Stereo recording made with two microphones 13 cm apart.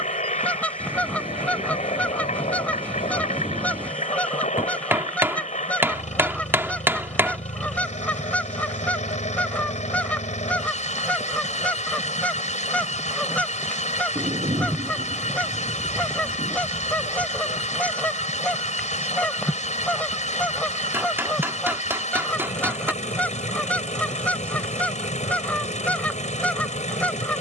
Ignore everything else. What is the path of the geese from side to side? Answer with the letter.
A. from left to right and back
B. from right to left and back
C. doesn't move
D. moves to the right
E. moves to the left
C.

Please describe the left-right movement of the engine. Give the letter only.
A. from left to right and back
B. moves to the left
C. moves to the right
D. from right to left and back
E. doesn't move
E.